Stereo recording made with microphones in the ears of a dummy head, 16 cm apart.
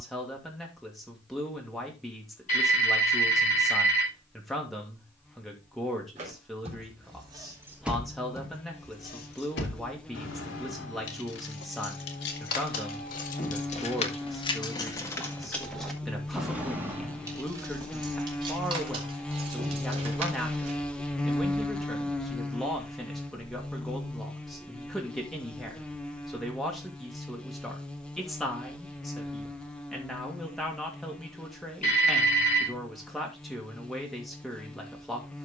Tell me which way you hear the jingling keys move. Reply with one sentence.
In this clip you hear the jingling keys move from right to left and back again.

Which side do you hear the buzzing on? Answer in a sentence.
You can hear the buzzing in the centre.